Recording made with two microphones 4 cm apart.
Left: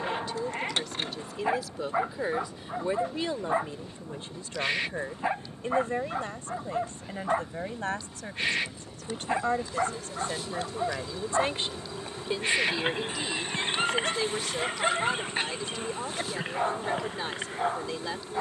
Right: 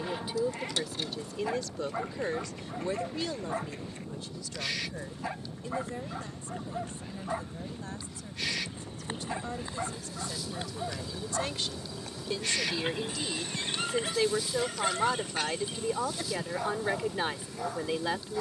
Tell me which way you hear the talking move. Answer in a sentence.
In this clip you hear the talking go left and come back.